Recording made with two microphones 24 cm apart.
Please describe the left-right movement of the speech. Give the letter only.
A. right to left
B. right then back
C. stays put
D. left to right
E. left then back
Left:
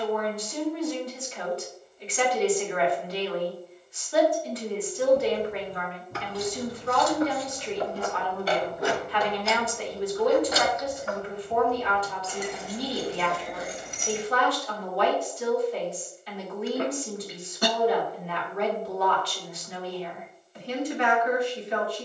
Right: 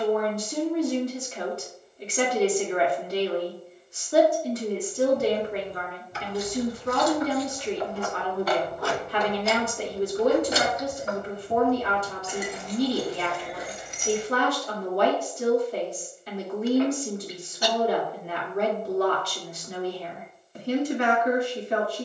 C.